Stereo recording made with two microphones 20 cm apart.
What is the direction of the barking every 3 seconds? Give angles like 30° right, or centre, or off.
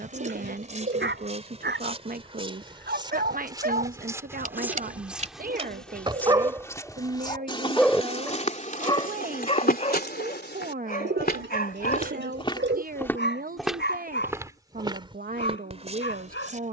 60° right, 40° right, 10° right, 40° left, 60° left, 70° left.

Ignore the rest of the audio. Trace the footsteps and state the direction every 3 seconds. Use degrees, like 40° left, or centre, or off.
30° right, 10° right, 20° left, 50° left, centre, 30° right.